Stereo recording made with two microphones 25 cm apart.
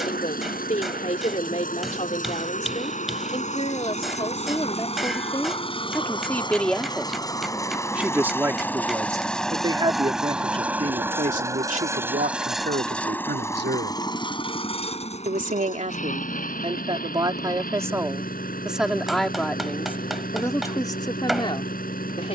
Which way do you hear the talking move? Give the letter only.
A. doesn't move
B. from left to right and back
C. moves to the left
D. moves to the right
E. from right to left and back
B.